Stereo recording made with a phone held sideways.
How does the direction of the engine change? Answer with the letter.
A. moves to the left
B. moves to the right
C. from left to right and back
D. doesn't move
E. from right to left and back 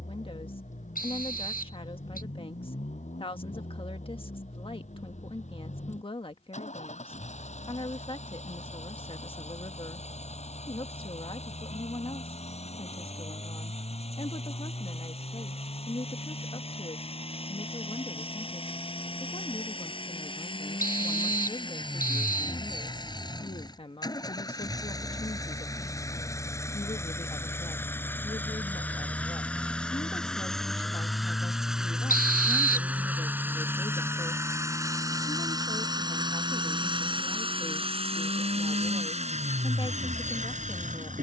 B.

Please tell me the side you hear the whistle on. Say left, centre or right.
left.